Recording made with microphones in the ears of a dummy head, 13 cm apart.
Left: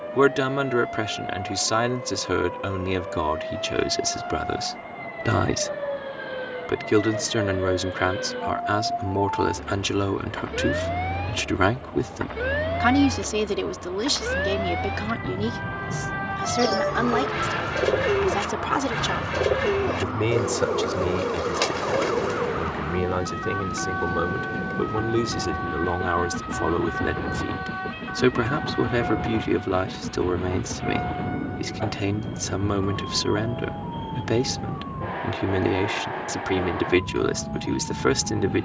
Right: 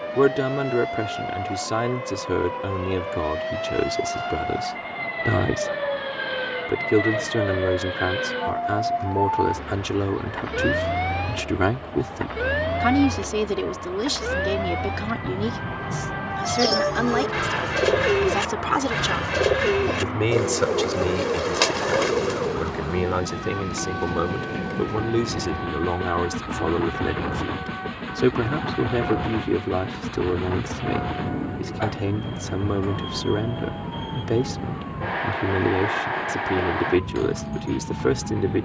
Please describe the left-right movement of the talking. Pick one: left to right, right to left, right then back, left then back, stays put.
right then back.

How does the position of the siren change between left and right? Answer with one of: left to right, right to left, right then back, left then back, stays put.
right to left.